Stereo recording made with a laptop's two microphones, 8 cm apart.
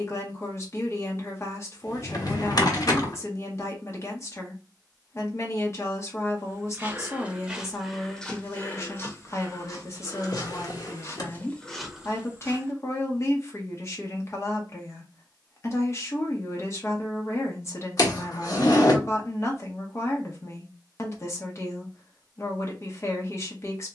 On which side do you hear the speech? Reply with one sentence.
In this clip you hear the speech on the left.